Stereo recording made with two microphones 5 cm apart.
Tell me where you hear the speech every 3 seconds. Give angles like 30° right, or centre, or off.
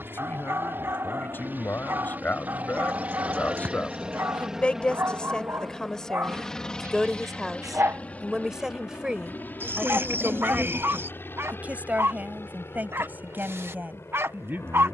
50° left, 20° left, centre, 30° right, 40° right.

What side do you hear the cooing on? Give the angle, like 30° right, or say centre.
50° right.